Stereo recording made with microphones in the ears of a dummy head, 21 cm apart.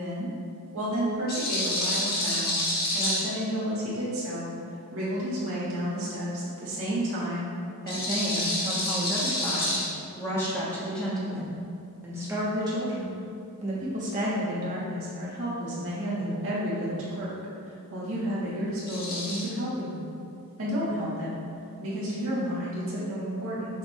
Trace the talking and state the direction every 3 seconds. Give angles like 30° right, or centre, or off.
60° right, 60° right, 40° right, centre, 30° right, 50° right, 60° right, 60° right.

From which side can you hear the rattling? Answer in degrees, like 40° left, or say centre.
40° left.